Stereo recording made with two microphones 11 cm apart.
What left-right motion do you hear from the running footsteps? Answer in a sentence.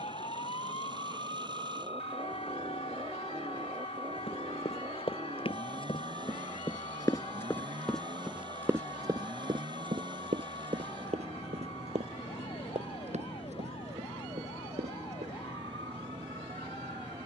You can hear the running footsteps go from the left side to the right.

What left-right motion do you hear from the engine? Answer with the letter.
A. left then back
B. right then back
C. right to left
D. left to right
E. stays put
E.